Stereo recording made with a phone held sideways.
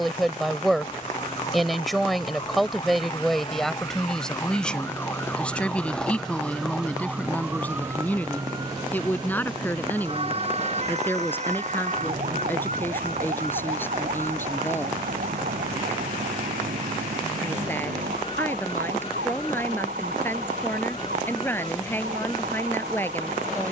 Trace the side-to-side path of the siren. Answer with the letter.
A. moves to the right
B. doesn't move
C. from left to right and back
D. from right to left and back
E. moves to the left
A.